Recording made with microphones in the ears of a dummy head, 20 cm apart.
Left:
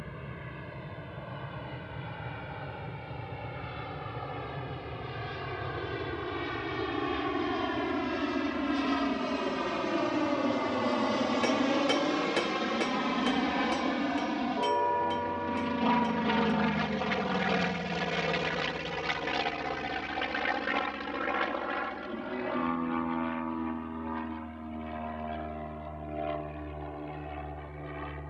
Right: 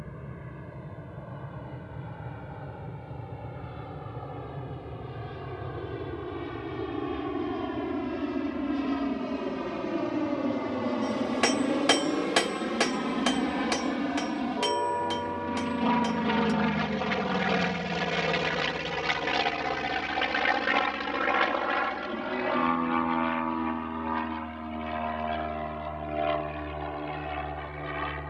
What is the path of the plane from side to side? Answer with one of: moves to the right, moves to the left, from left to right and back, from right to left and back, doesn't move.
moves to the right.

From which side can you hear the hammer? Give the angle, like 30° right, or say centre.
50° right.